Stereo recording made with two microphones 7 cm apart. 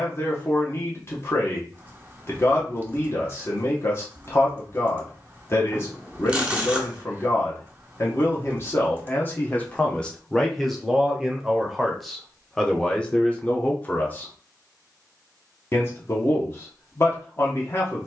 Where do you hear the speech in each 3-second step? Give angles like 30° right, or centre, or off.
40° left, 40° left, 40° left, 10° left, 20° left, 30° left.